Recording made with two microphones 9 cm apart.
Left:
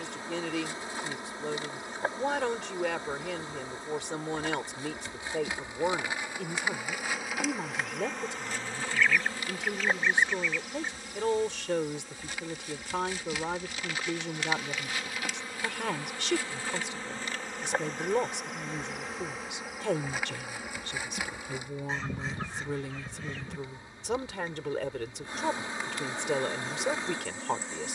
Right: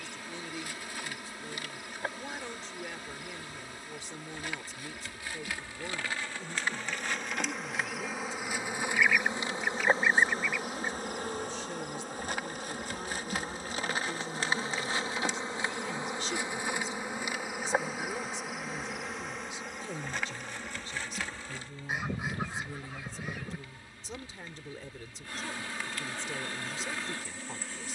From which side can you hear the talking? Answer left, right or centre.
left.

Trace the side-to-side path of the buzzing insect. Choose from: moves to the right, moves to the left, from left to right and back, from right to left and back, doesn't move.
from left to right and back.